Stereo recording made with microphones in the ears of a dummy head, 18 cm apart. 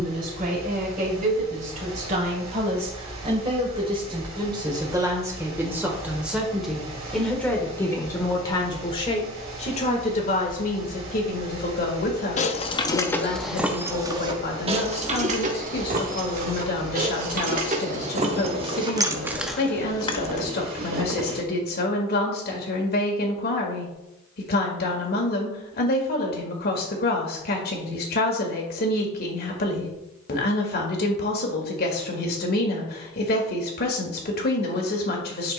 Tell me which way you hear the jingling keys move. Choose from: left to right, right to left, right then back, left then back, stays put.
right then back.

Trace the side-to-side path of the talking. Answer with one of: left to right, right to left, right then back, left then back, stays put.
right to left.